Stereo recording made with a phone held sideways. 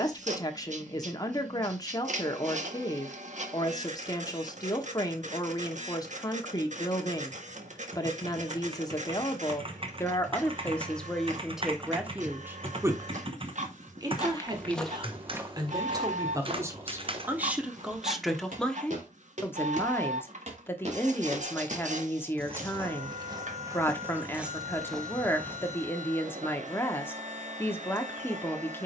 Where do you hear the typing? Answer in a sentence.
You can hear the typing on the right.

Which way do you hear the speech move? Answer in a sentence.
In this clip you hear the speech go right and come back.